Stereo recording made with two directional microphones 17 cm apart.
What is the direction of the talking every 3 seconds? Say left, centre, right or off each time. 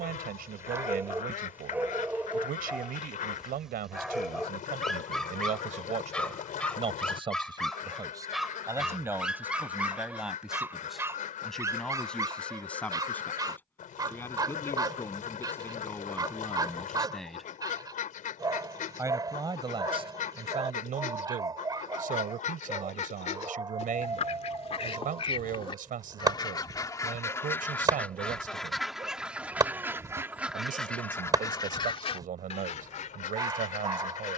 right, right, right, centre, centre, centre, right, right, right, right, right, right.